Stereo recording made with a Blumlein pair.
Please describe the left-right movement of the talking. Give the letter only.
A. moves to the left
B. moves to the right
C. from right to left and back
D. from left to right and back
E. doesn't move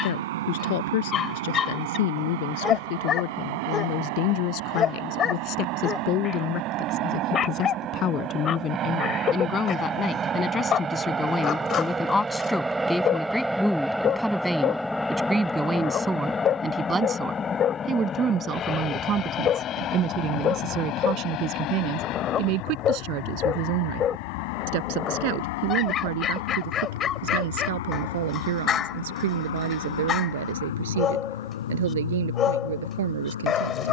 B.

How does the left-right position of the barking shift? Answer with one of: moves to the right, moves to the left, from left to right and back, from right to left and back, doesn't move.
doesn't move.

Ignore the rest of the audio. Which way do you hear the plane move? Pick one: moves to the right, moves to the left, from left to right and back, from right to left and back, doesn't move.
moves to the left.